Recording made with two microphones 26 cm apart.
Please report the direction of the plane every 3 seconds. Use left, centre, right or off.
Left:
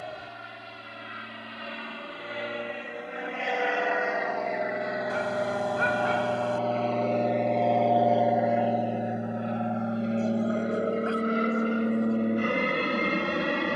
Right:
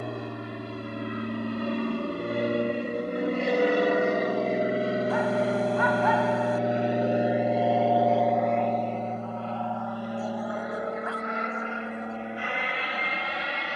right, right, centre, left, left.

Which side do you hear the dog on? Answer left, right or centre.
left.